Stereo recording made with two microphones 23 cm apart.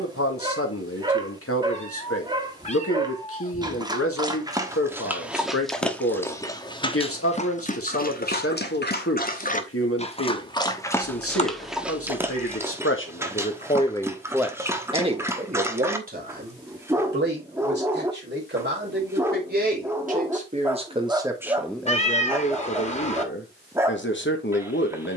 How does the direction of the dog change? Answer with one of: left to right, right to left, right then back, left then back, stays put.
left then back.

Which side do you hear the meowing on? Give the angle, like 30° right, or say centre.
30° left.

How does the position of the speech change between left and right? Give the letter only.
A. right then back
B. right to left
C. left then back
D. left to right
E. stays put
A.